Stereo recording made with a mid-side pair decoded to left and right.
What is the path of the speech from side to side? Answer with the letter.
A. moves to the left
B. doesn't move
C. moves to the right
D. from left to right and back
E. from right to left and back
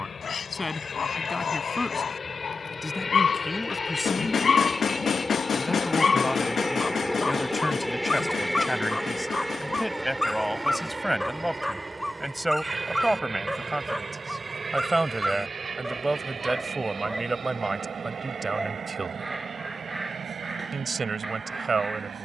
C.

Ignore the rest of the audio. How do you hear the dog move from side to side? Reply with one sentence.
You can hear the dog go from the left side to the right.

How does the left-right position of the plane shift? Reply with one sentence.
In this clip you hear the plane travel towards the right.